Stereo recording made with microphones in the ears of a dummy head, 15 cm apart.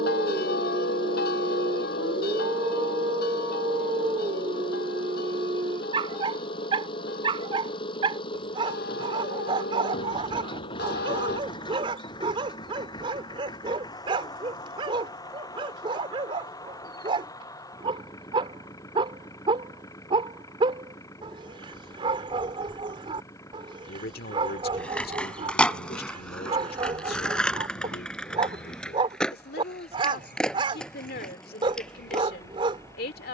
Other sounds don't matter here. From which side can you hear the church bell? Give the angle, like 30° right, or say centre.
60° left.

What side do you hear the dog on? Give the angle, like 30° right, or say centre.
30° right.